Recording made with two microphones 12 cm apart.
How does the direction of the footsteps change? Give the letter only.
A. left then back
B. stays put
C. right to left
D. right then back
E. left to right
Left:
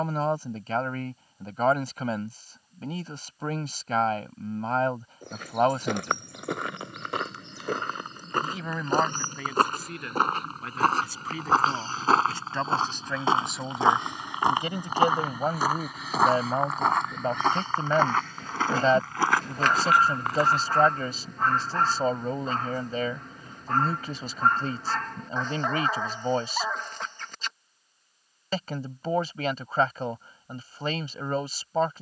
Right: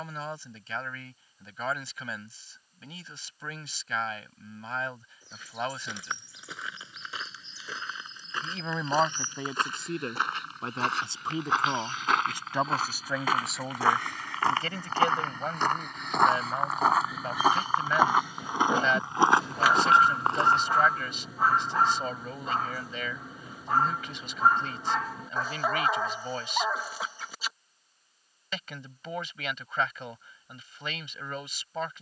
E.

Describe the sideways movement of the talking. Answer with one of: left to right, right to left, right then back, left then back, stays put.
right then back.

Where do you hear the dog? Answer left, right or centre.
centre.